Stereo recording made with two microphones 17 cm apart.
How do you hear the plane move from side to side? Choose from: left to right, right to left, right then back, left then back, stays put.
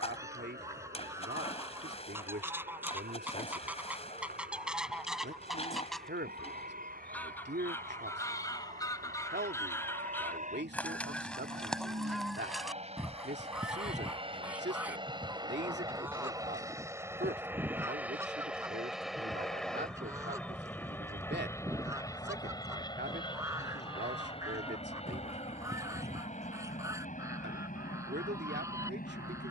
right to left.